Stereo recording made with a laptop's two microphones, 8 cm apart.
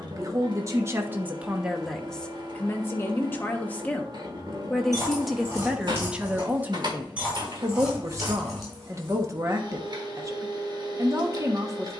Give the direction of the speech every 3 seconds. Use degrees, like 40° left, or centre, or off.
10° right, 10° left, 30° right, 40° right.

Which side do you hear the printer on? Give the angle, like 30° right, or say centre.
60° right.